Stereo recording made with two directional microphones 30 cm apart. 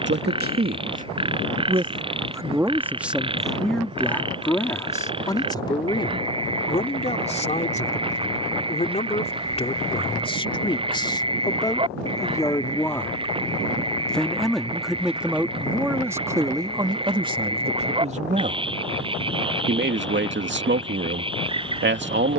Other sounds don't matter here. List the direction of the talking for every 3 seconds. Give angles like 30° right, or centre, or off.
20° right, 10° left, 20° left, 20° left, 10° left, 10° right, 30° right, 40° right.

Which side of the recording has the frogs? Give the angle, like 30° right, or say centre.
20° right.